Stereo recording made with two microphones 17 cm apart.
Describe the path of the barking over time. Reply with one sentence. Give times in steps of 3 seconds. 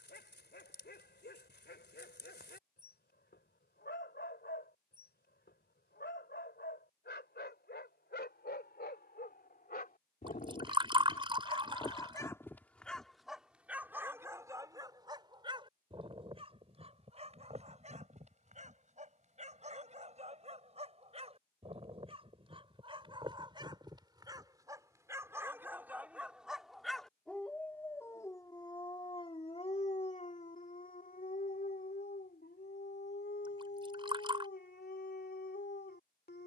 In this clip you hear the barking on the left from 0 s, in the centre from 12 s, on the right from 15 s, in the centre from 24 s and on the left from 27 s.